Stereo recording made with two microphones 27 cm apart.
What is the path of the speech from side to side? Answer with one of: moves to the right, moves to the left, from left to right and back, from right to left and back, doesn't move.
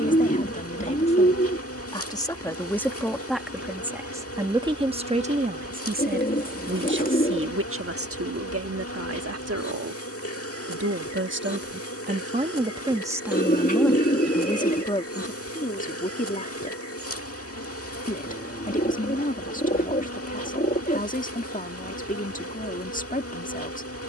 from left to right and back.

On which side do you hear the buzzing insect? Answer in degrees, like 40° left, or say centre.
60° left.